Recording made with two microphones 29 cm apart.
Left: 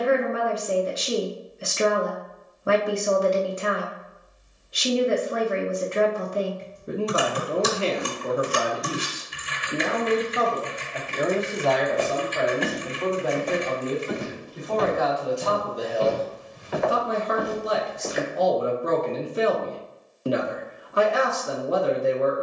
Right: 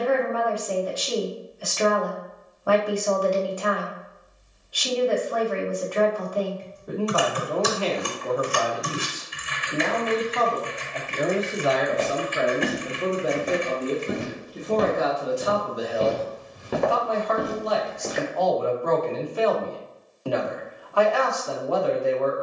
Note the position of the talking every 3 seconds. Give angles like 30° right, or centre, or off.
20° left, 20° left, 20° left, 10° left, 20° right, centre, 20° left, 20° left.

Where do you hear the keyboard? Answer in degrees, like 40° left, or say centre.
50° left.